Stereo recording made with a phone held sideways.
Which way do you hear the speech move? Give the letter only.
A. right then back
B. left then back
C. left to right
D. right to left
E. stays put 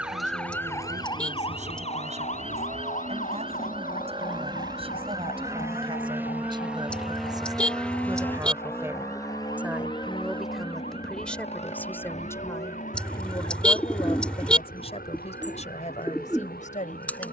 D.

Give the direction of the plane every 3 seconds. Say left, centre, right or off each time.
right, right, centre, left, left, left.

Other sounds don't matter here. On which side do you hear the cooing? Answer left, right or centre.
centre.